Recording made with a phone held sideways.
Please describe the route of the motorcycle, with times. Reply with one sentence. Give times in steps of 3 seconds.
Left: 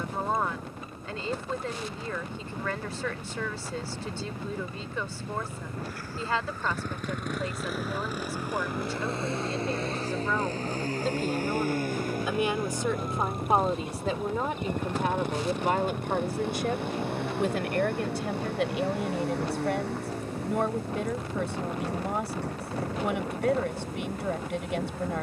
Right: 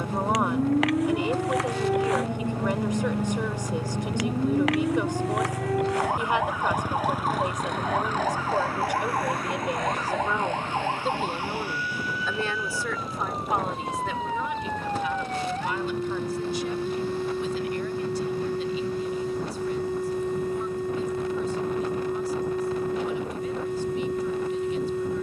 You can hear the motorcycle on the right from 0 s, in the centre from 6 s and on the left from 9 s.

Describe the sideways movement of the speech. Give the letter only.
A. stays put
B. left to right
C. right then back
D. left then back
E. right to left
E.